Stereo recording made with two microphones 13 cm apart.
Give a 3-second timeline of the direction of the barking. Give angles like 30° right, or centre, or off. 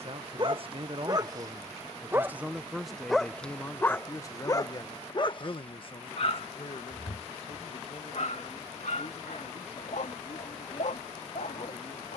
30° right, 20° left, 60° left, 70° left.